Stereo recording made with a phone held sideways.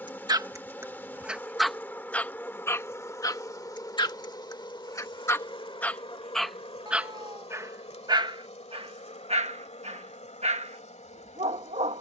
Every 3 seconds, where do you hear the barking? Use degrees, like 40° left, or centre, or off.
10° right, 20° left, 20° right, 50° right.